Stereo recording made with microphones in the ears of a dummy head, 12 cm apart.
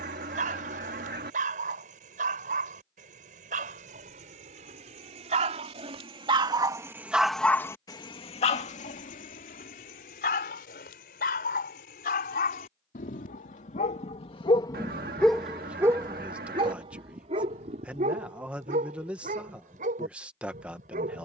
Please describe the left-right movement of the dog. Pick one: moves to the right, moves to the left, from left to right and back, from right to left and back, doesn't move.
from right to left and back.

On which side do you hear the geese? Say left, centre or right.
right.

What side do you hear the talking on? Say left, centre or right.
centre.